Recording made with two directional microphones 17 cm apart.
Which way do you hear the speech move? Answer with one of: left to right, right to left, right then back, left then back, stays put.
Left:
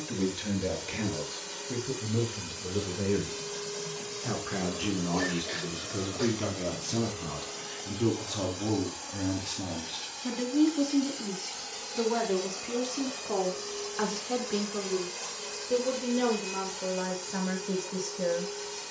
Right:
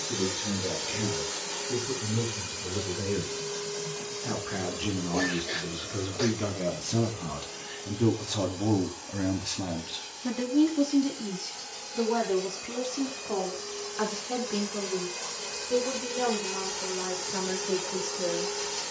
right then back.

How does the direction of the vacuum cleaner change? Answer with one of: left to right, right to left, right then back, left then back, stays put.
left then back.